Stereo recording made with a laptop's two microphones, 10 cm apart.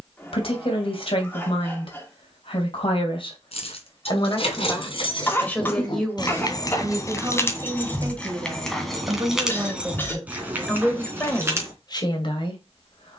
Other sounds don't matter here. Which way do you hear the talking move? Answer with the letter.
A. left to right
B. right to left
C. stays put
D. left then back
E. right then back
E.